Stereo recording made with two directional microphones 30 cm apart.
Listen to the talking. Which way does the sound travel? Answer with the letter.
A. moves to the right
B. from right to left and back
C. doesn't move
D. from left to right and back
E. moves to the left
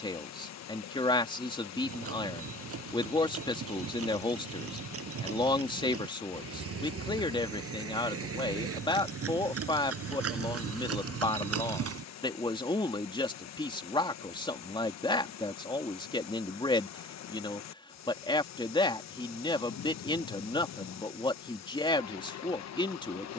C.